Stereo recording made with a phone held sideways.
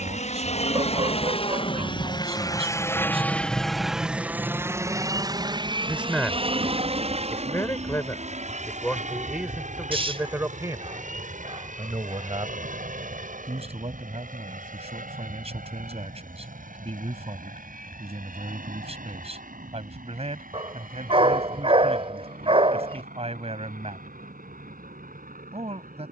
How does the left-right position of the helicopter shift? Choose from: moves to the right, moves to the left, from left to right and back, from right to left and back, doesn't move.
moves to the right.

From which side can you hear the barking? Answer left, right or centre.
right.